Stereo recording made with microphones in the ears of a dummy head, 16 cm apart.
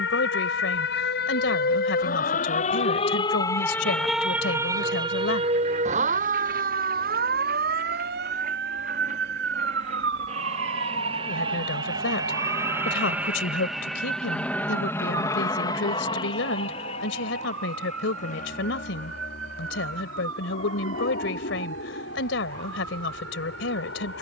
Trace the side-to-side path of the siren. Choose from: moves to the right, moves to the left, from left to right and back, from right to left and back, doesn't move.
moves to the right.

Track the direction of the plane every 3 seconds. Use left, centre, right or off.
off, right, right, right, centre, left, left, left.